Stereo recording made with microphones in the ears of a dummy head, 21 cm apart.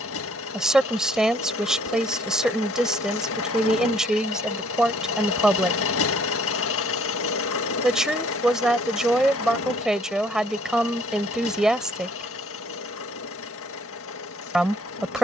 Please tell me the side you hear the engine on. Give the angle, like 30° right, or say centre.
70° left.